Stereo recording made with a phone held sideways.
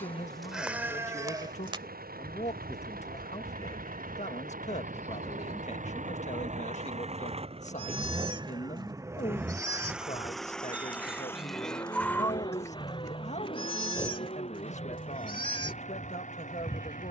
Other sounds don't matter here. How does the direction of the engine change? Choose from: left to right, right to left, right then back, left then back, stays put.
right to left.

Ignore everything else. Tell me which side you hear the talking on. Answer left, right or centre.
left.